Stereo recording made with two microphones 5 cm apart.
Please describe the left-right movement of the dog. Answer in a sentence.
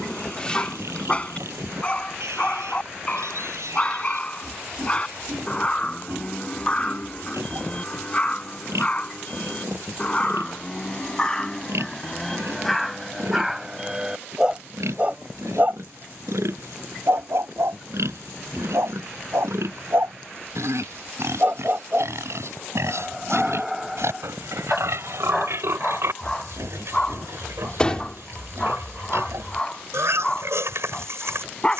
In this clip you hear the dog move from left to right and back again.